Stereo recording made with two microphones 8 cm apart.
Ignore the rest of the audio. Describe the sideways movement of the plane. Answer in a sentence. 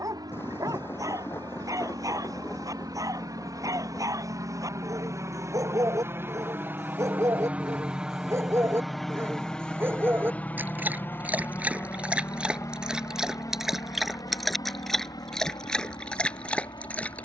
You can hear the plane move to the left.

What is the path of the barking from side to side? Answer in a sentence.
You can hear the barking move from right to left.